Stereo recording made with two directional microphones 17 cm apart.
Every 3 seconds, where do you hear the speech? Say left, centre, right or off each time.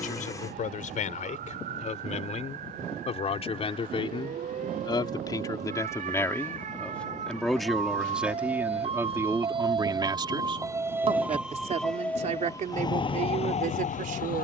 left, left, centre, right, right.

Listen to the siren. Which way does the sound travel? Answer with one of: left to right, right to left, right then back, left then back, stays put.
right to left.